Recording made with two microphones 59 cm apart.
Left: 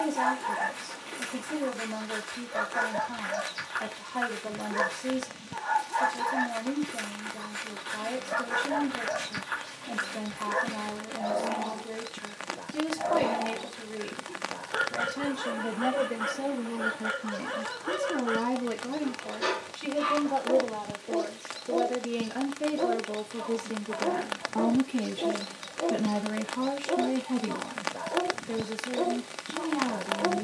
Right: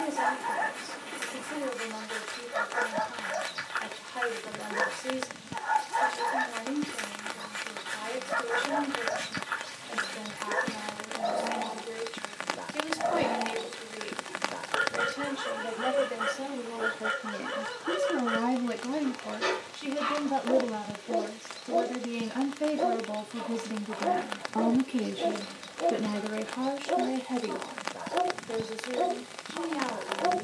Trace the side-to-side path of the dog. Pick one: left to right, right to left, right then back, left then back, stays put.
stays put.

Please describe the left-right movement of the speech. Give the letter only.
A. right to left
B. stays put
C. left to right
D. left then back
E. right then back
E.